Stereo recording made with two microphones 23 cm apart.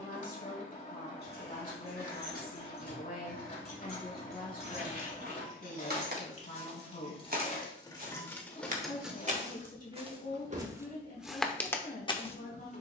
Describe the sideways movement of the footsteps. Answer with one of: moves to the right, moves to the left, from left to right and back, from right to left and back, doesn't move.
moves to the left.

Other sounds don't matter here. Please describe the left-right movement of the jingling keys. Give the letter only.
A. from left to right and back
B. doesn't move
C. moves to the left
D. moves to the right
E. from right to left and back
D.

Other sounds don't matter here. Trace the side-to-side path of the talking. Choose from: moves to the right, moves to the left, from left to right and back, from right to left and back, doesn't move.
doesn't move.